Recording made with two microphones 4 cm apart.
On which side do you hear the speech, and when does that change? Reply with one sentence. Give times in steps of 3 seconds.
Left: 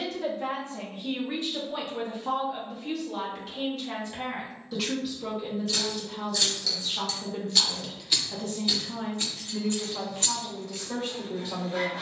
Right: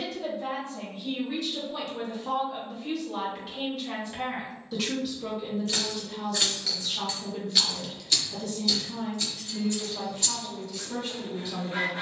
You can hear the speech on the left from 0 s, in the centre from 3 s and on the left from 6 s.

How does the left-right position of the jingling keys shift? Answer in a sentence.
You can hear the jingling keys go from the right side to the left.